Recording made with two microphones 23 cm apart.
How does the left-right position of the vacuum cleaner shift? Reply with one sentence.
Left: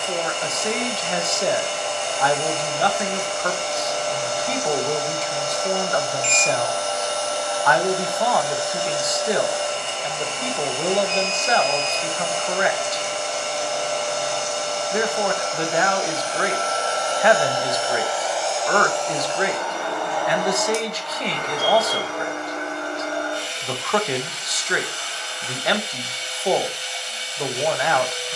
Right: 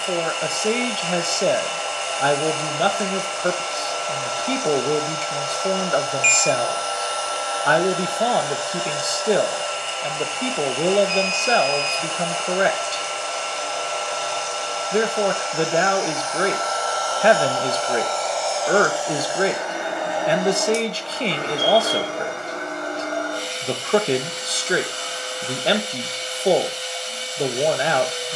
You can hear the vacuum cleaner travel towards the right.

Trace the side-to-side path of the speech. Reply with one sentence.
You can hear the speech stay put.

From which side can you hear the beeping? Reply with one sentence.
You can hear the beeping on the right.